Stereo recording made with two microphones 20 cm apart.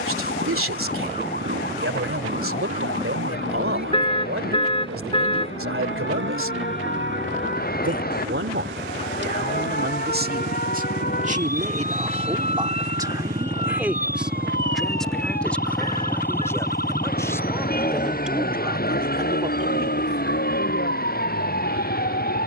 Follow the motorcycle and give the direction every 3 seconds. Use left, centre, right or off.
right, right, right, right, right, centre, left, left.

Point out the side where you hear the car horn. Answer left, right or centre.
left.